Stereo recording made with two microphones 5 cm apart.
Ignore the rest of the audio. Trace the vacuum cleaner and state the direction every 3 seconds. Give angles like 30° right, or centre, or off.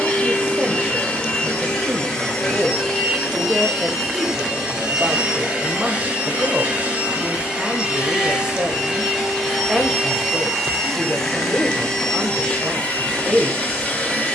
10° left, 10° right, 20° right, centre, 20° left.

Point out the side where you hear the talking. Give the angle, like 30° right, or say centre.
20° right.